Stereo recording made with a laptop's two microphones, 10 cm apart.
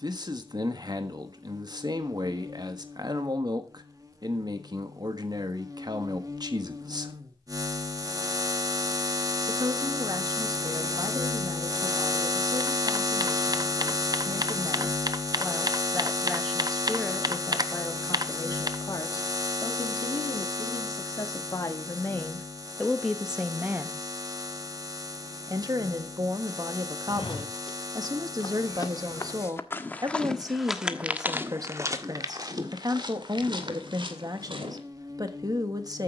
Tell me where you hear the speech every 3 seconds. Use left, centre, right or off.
right, right, right, right, right, centre, left, centre, right, right, right, right.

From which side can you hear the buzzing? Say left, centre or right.
right.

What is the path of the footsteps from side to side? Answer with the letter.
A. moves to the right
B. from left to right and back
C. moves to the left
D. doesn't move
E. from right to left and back
A.